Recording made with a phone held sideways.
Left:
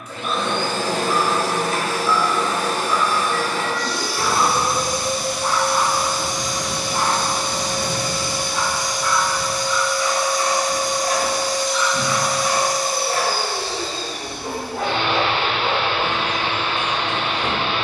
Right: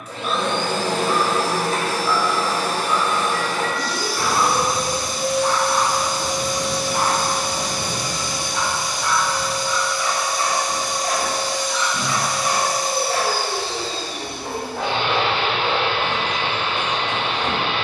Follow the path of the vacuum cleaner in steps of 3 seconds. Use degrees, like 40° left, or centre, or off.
30° right, centre, 10° right, 20° right, 20° right, 20° right.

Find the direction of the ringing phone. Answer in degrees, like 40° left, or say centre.
10° left.